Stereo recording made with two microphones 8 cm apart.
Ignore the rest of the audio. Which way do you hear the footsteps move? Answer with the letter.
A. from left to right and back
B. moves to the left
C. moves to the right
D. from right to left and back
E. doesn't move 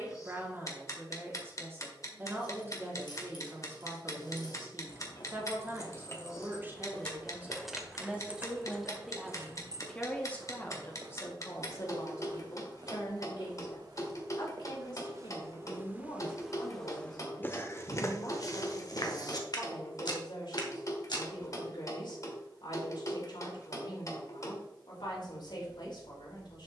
A.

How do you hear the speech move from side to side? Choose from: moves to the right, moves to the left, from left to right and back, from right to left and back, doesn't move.
moves to the left.